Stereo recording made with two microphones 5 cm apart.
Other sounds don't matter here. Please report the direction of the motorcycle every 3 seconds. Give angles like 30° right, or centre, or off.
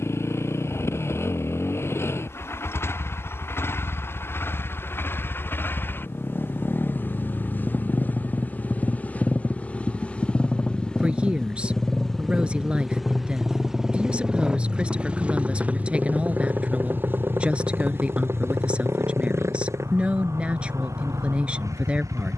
50° left, 40° left, 30° left, 20° left, centre, 30° right, 50° right, 60° right.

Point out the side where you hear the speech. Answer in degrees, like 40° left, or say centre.
20° right.